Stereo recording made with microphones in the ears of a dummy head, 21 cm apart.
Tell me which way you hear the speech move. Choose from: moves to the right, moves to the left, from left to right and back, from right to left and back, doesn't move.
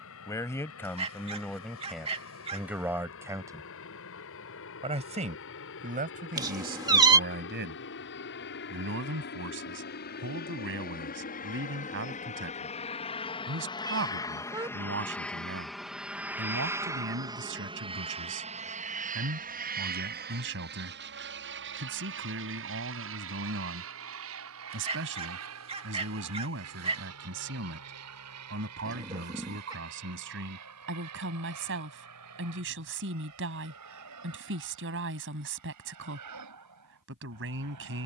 moves to the right.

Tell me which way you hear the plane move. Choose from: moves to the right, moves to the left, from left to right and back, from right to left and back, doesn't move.
moves to the right.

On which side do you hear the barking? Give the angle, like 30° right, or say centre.
30° right.